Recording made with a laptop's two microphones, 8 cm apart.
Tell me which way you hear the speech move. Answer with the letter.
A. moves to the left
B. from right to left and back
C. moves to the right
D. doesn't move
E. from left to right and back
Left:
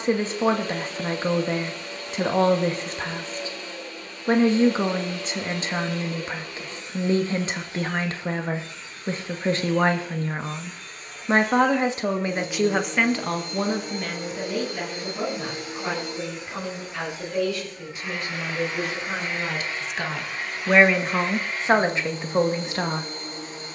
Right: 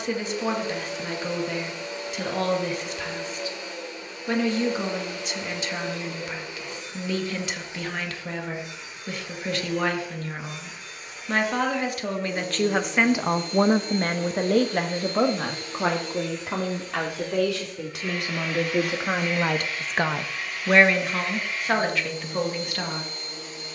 E.